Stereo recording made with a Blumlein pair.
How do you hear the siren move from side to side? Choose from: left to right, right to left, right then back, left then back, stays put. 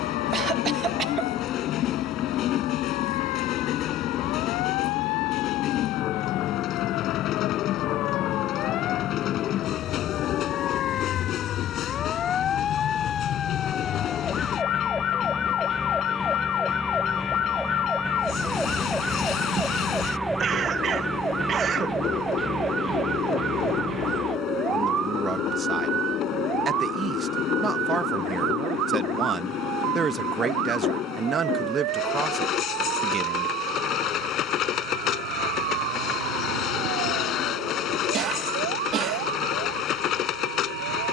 left to right.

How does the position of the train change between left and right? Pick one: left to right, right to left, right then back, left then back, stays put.
stays put.